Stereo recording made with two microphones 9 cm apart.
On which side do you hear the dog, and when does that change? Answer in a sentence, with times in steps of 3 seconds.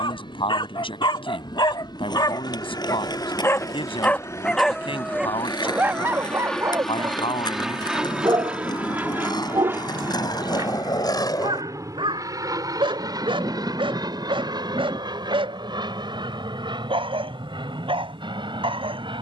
You can hear the dog on the left from 0 s, in the centre from 3 s and on the right from 6 s.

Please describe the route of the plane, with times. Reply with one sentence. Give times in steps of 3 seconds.
You can hear the plane on the left from 0 s, in the centre from 6 s and on the right from 9 s.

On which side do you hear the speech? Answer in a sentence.
In this clip you hear the speech on the left.